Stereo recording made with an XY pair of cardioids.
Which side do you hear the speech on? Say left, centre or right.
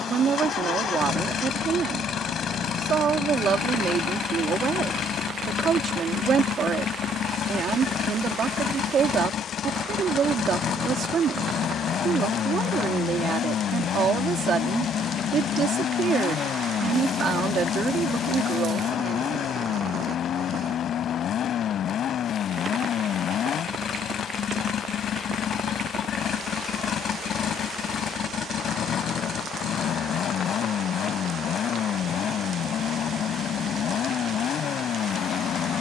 right.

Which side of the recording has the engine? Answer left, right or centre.
left.